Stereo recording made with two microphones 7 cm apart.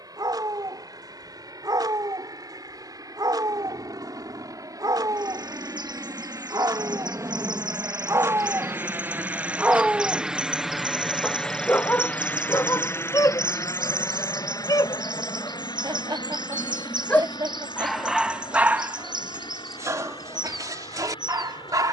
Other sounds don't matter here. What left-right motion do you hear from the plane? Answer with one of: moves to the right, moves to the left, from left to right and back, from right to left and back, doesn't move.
moves to the left.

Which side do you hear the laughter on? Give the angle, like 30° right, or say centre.
70° right.